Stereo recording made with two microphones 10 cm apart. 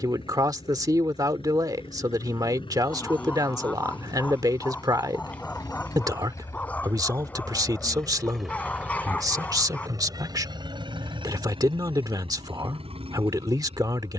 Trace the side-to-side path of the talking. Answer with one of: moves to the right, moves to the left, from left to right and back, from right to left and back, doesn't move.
doesn't move.